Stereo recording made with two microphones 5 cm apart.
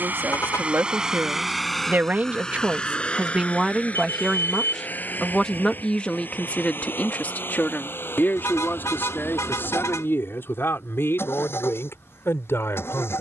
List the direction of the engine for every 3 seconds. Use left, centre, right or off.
centre, left, left, left, left.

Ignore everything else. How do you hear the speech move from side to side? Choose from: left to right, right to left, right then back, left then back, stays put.
right to left.